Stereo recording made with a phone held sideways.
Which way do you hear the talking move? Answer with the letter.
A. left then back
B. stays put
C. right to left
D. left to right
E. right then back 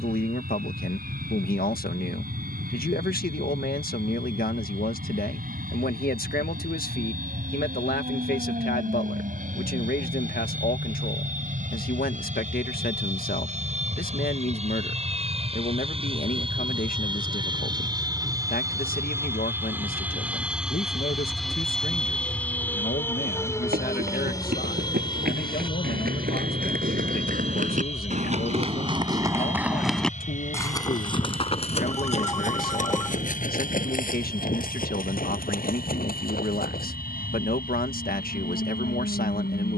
B.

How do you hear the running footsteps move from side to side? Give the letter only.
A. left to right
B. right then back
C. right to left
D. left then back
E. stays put
C.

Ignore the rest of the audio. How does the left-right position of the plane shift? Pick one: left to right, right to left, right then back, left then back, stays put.
right to left.